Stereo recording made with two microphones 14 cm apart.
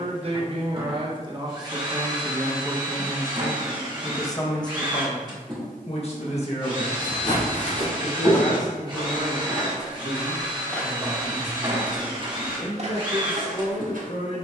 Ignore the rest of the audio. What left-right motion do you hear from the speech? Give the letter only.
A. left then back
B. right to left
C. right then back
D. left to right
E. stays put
B.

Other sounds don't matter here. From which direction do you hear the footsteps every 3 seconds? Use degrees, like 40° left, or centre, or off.
off, off, 50° left, 10° left, 50° right.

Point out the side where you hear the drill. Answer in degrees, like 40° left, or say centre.
30° right.